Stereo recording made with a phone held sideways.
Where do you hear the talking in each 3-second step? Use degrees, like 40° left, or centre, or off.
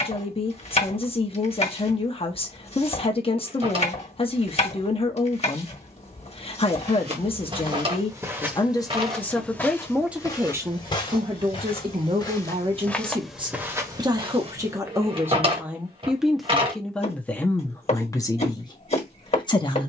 30° left, 30° left, 30° left, 10° right, 30° right, centre, 20° left.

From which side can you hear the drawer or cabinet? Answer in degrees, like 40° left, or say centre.
30° right.